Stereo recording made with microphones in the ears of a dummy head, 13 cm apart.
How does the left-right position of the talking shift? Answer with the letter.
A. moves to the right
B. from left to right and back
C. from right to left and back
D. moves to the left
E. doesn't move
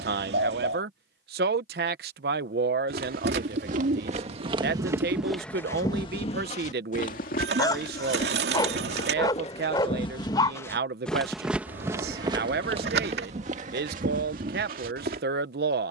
E.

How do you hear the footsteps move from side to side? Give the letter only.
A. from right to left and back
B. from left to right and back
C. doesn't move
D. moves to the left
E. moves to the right
A.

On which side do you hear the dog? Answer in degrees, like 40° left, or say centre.
20° left.